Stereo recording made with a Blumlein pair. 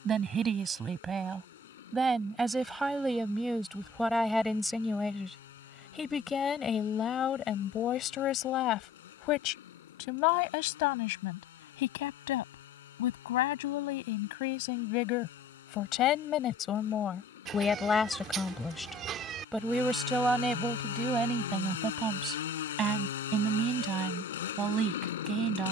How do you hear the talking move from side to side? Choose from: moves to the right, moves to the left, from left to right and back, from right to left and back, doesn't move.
from right to left and back.